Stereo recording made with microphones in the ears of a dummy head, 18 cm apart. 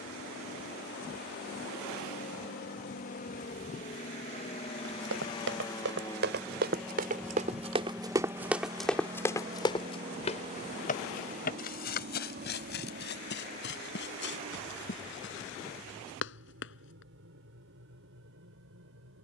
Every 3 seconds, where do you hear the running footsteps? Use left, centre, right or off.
off, right, right, left, left, left, off.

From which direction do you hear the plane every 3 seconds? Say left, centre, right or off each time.
left, left, centre, right, right, right, right.